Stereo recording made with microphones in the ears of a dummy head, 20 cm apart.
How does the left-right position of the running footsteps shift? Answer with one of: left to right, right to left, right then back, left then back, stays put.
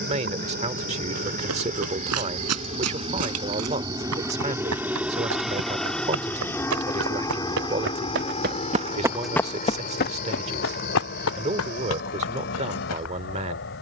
right to left.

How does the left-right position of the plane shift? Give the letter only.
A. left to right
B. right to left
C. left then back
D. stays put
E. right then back
B.